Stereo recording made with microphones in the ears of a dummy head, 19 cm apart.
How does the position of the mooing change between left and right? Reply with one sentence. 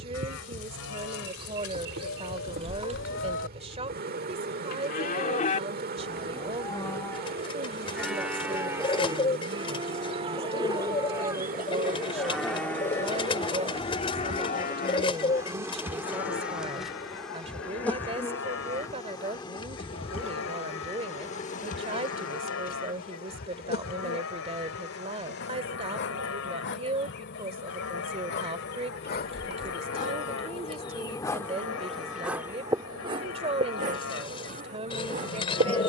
You can hear the mooing go right and come back.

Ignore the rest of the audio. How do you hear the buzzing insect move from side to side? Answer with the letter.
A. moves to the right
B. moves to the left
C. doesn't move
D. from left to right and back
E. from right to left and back
E.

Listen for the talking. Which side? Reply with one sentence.
You can hear the talking on the right.